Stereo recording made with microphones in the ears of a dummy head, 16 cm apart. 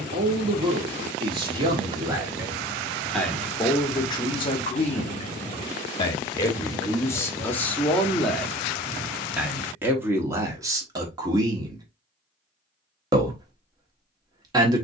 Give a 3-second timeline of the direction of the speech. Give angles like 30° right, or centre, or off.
20° right, 20° left, 10° left, 20° right, 20° right.